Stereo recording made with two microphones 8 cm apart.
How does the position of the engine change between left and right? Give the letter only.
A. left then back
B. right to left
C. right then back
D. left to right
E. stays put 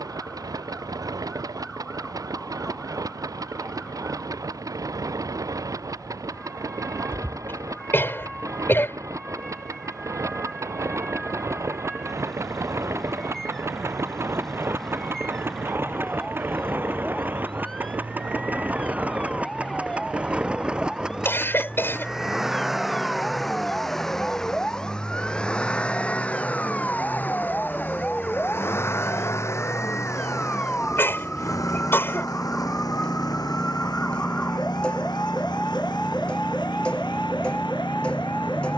B.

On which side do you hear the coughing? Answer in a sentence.
In this clip you hear the coughing on the left.